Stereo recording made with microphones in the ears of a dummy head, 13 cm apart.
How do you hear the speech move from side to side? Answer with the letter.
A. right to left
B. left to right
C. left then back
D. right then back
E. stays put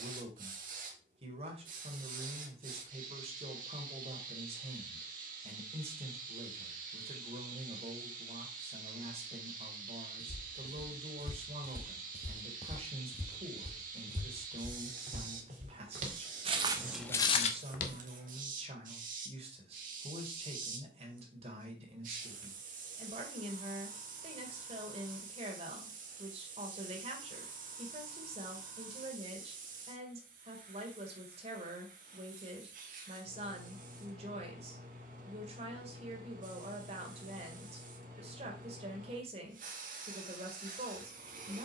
E.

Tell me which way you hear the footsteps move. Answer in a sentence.
You can hear the footsteps go right and come back.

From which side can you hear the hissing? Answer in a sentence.
You can hear the hissing on the right.